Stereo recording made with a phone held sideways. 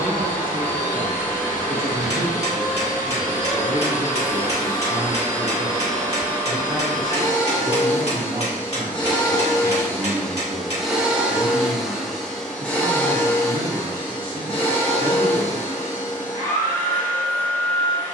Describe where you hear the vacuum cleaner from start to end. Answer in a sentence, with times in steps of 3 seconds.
In this clip you hear the vacuum cleaner on the left from 0 s, in the centre from 9 s and on the left from 12 s.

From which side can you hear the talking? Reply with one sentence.
You can hear the talking on the right.